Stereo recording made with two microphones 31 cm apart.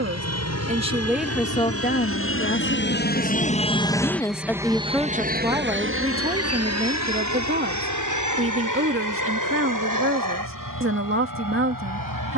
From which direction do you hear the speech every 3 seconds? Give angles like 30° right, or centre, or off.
10° left, centre, 30° right, 40° right.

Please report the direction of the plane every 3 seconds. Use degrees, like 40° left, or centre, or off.
60° left, centre, 60° right, 70° right.